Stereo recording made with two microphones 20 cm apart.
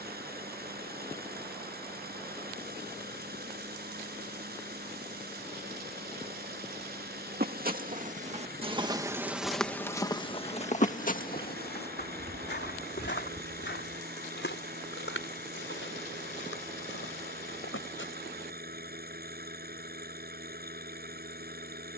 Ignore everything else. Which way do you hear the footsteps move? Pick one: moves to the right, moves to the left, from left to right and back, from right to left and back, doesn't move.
moves to the left.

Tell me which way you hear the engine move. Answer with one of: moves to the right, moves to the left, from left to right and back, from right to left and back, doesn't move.
doesn't move.